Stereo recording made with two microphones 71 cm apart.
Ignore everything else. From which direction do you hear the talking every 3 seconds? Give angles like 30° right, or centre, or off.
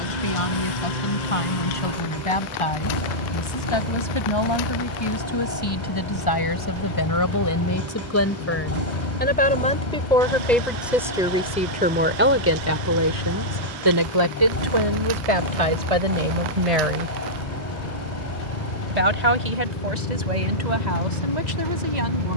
50° left, 40° left, 30° left, centre, 30° right, 50° right, 70° right, 80° right.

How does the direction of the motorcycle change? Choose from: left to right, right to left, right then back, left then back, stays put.
stays put.